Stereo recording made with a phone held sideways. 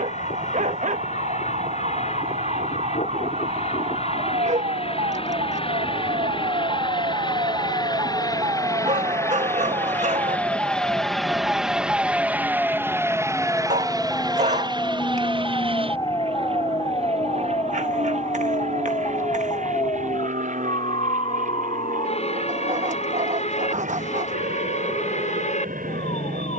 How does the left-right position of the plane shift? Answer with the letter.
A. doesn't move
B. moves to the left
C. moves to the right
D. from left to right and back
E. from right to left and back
C.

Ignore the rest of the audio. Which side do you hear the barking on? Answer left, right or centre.
right.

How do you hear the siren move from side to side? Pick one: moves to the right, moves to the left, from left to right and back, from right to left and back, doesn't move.
moves to the left.